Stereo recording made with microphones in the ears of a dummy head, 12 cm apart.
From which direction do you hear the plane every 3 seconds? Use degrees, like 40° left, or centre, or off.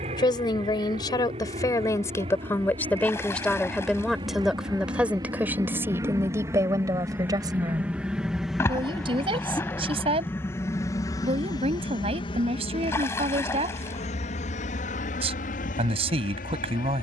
50° right, 30° right, 10° right, 20° left, 40° left, 60° left.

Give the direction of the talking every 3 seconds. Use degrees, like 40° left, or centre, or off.
20° left, centre, 30° right, 40° right, 40° right, 40° right.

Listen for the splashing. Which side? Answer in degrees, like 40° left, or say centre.
20° left.